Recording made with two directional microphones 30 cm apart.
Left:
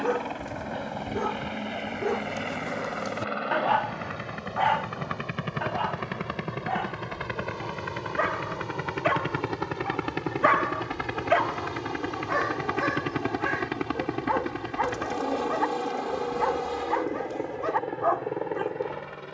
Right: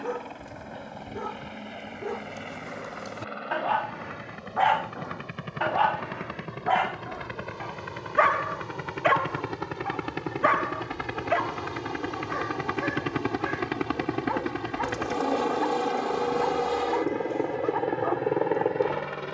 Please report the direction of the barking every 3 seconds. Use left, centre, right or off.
left, centre, right, centre, left, left, left.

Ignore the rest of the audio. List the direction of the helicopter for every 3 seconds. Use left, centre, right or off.
left, left, left, centre, centre, right, right.